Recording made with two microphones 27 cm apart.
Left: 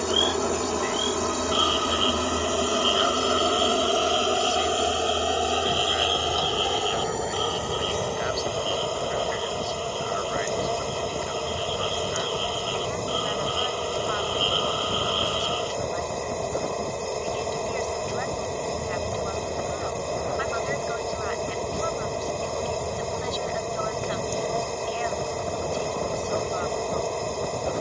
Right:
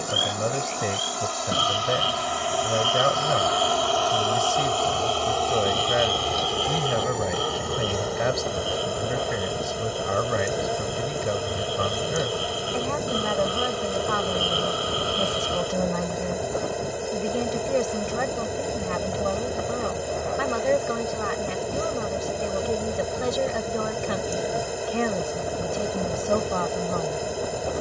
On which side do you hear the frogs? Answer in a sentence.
You can hear the frogs on the right.